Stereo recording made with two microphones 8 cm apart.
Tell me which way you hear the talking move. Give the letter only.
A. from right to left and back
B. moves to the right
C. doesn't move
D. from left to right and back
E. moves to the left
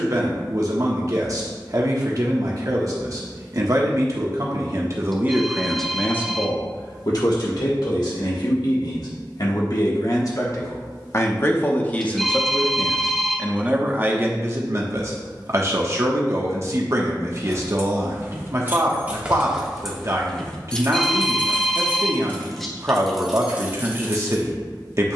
A.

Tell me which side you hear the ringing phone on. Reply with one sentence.
In this clip you hear the ringing phone in the centre.